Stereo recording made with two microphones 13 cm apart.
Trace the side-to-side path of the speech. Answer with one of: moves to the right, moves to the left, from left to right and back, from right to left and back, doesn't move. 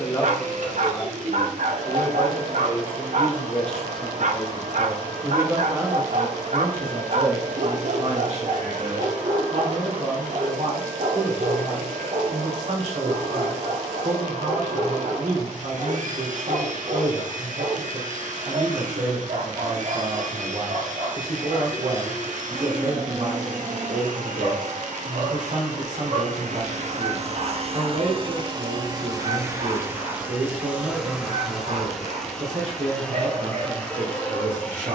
moves to the right.